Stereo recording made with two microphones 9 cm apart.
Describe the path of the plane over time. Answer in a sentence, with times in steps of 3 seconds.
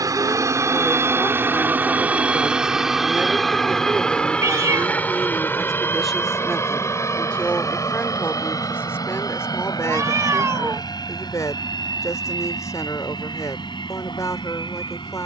In this clip you hear the plane on the right from 0 s, in the centre from 3 s and on the left from 6 s.